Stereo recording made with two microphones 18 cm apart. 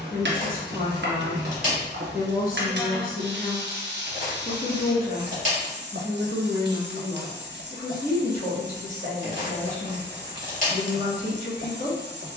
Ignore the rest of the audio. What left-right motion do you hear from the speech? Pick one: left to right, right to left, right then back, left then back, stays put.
stays put.